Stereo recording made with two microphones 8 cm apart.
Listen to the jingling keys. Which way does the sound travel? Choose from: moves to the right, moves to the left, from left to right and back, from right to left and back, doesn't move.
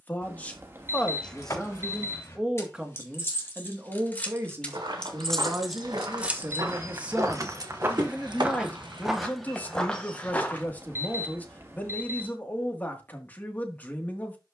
moves to the right.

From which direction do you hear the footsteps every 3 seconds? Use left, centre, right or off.
off, right, right, centre, off.